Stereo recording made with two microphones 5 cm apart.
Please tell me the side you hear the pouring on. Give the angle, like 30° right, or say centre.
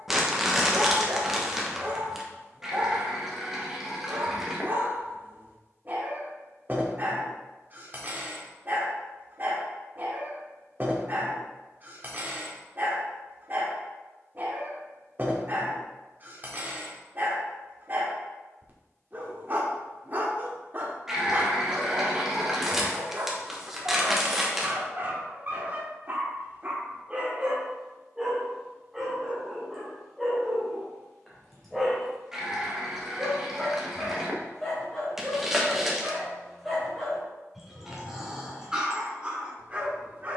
10° right.